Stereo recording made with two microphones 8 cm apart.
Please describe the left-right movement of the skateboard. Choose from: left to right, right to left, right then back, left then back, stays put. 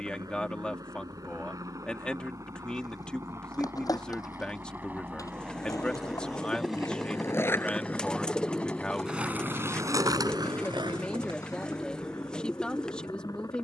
left to right.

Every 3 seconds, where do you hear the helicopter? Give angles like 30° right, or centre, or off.
50° right, 30° right, centre, 30° left, 40° left.